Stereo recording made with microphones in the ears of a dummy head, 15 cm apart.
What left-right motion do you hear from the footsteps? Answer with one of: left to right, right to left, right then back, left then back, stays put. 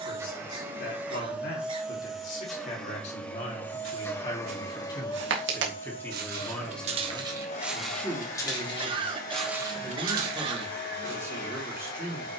left then back.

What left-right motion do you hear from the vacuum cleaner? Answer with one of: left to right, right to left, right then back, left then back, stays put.
right to left.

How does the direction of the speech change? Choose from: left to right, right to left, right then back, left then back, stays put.
left to right.